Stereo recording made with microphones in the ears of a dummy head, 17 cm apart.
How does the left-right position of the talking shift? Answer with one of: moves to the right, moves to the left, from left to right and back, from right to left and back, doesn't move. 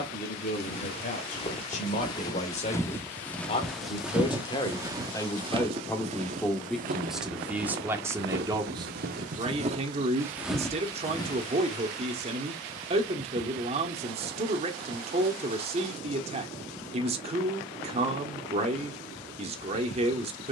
moves to the right.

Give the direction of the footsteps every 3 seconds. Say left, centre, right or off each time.
left, centre, right, centre, off, off, off.